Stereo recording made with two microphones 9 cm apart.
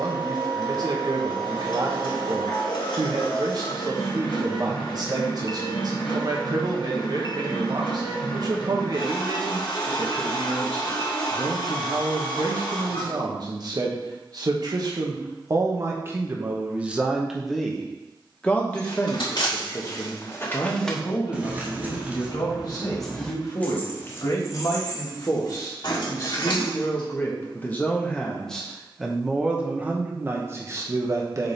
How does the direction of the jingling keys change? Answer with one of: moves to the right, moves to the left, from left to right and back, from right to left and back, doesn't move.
from left to right and back.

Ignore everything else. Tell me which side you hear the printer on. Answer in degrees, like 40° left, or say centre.
70° left.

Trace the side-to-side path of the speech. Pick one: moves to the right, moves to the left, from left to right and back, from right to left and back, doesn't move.
from right to left and back.